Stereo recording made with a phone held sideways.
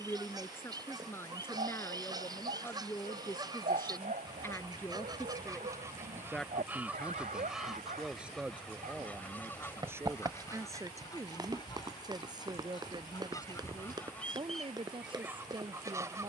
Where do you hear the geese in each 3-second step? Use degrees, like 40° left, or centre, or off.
30° right, 20° right, centre, 20° left, 20° left, 20° right.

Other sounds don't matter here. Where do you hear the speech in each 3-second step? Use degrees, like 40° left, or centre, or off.
20° left, 10° left, centre, 20° right, 30° right, 30° right.